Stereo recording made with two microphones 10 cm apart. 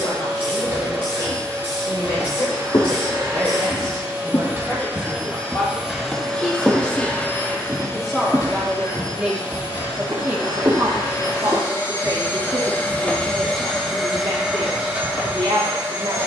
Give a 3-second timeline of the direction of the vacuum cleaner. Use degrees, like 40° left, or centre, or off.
30° right, 20° right, 20° left, 40° left, 10° left, 20° right.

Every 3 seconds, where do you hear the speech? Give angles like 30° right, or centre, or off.
40° left, 30° left, 10° left, 20° right, 60° right, 60° right.